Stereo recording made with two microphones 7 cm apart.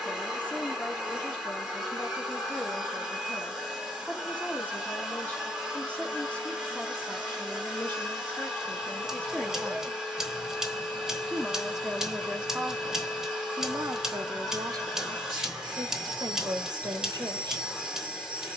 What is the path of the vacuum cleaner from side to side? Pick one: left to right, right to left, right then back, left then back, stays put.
stays put.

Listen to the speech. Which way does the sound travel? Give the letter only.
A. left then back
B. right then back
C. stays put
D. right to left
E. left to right
E.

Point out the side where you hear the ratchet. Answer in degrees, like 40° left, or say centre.
10° right.